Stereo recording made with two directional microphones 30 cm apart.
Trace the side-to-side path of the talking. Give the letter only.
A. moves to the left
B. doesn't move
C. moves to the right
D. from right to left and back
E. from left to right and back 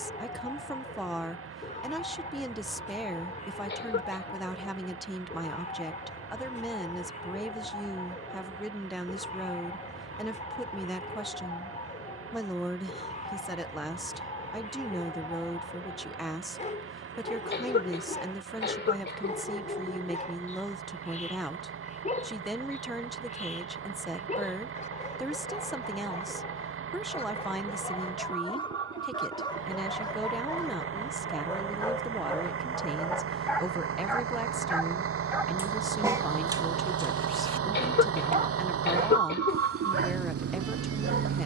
B.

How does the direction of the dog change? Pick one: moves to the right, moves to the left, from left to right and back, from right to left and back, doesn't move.
moves to the right.